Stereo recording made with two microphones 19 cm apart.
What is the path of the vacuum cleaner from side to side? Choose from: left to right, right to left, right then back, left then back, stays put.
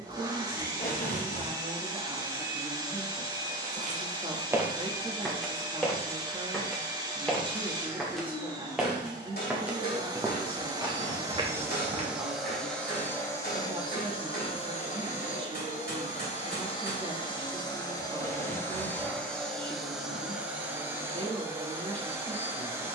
left then back.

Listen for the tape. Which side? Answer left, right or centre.
left.